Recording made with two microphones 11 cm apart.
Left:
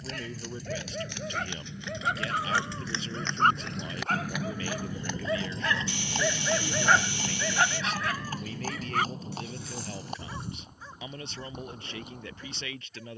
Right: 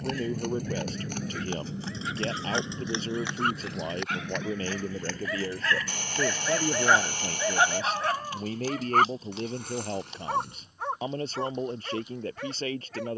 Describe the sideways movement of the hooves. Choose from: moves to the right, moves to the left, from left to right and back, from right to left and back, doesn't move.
moves to the left.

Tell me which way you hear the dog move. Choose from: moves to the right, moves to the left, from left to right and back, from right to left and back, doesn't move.
moves to the right.